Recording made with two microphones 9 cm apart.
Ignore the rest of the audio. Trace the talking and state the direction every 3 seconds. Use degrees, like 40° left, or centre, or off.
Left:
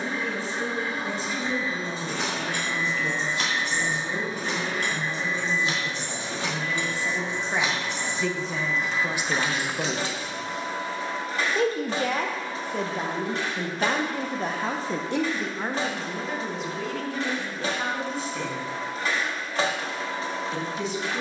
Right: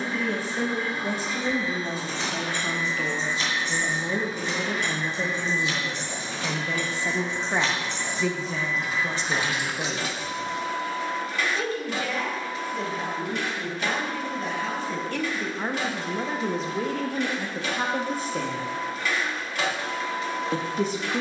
50° right, 50° right, 10° right, 30° left, 50° left, 30° right, 50° right.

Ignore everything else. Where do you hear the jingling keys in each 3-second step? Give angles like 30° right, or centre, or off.
70° left, 50° left, 20° left, 20° right, off, off, off.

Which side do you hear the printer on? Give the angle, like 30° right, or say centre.
40° left.